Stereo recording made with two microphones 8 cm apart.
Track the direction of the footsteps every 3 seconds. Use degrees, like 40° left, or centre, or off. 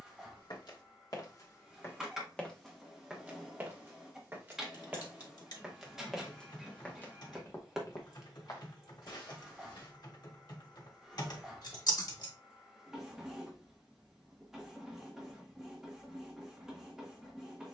40° left, 20° right, 30° left, 60° left, off, off.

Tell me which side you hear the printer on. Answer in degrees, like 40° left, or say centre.
10° right.